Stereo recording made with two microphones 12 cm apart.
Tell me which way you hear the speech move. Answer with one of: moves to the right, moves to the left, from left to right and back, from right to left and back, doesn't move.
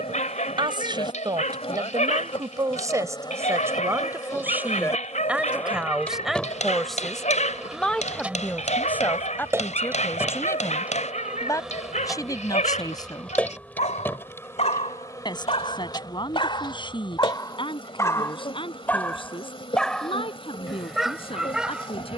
moves to the left.